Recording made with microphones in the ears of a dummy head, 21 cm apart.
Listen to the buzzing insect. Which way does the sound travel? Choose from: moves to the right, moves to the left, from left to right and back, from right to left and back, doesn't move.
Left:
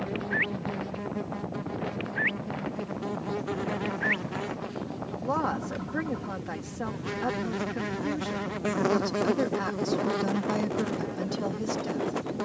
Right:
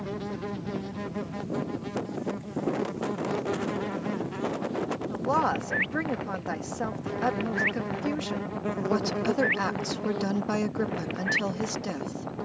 moves to the left.